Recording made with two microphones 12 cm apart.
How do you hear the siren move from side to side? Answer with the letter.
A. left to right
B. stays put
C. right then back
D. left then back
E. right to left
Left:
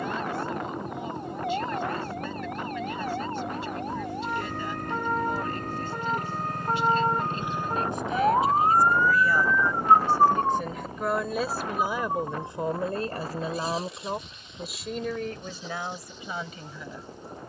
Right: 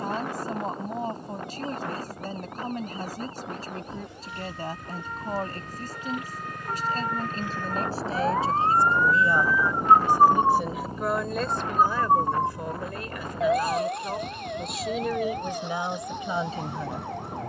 A.